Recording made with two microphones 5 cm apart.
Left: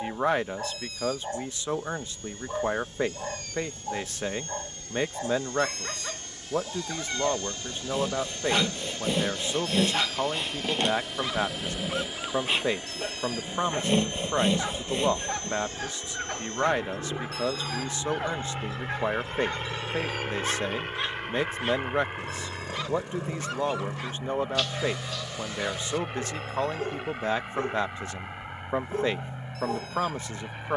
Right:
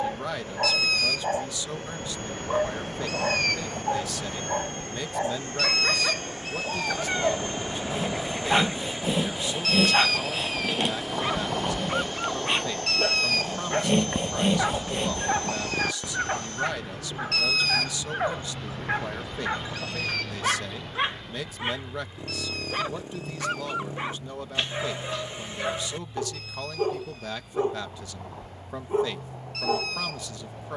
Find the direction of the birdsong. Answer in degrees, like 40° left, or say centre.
70° right.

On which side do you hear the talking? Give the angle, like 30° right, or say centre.
40° left.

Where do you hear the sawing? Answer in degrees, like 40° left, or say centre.
centre.